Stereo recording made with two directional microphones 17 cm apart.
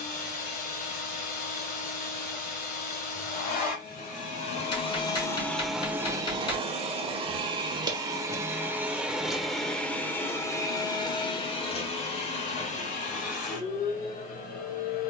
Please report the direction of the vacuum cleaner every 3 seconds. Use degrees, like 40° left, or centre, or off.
60° left, 40° left, 20° right, 20° left, 50° left.